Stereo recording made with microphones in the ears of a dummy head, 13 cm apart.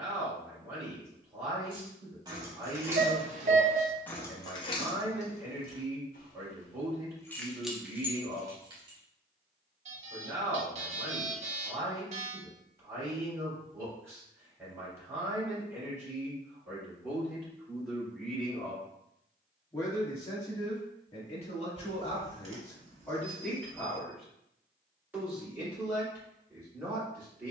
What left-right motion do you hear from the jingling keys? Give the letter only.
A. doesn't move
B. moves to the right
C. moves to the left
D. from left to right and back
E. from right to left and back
E.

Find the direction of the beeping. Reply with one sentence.
In this clip you hear the beeping on the right.